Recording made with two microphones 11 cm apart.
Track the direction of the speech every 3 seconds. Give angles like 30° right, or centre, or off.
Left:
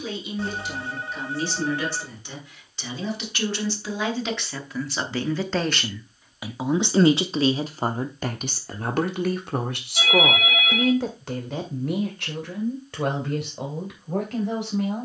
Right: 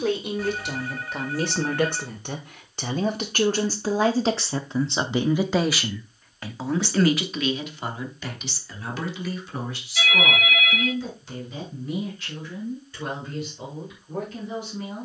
60° right, 30° right, 30° left, 60° left, 80° left.